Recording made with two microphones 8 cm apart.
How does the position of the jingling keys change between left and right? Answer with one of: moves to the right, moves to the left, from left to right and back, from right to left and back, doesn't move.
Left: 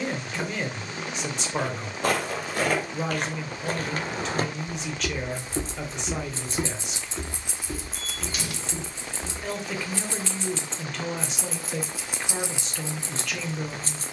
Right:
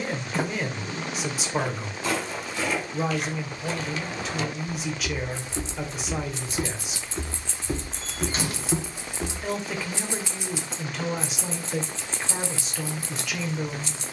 from left to right and back.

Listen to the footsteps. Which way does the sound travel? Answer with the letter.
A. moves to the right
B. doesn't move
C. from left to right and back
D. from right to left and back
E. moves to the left
A.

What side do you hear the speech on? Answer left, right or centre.
centre.